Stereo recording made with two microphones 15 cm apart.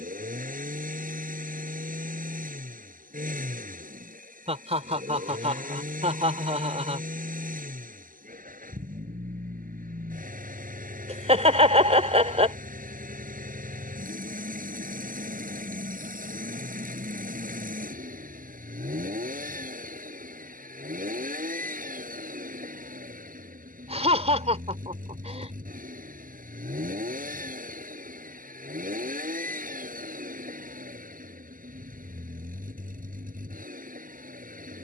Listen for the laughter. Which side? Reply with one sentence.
You can hear the laughter on the right.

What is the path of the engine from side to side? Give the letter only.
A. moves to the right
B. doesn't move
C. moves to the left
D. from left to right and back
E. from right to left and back
B.